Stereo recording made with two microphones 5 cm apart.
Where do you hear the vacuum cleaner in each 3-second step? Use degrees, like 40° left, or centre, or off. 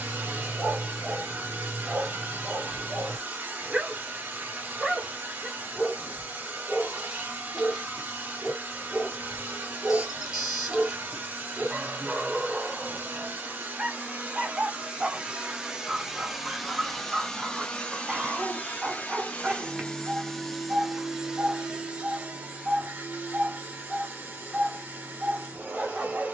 40° right, 40° right, 40° right, 40° right, 40° right, centre, 20° left, 30° right, 40° right.